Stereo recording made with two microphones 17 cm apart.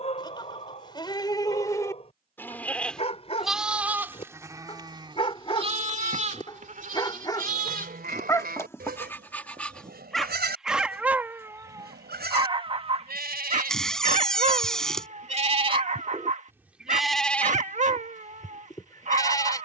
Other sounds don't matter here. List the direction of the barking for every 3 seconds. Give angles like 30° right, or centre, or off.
40° left, 40° left, 20° left, centre, 40° right, 50° right, 50° right.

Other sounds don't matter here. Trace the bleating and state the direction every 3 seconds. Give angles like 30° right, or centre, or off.
20° left, 20° right, 60° right, 80° right, 70° right, 10° right, 20° left.